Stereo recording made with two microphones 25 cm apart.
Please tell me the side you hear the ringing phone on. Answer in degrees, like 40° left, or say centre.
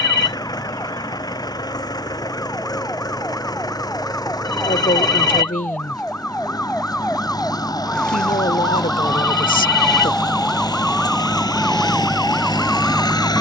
40° left.